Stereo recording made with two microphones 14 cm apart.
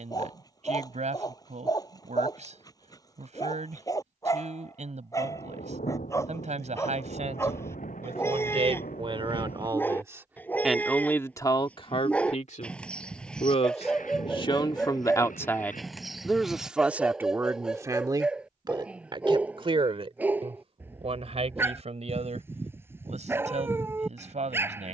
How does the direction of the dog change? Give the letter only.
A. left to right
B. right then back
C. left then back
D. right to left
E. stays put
A.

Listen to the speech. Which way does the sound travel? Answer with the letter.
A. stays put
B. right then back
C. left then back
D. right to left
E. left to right
C.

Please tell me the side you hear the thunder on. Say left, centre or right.
left.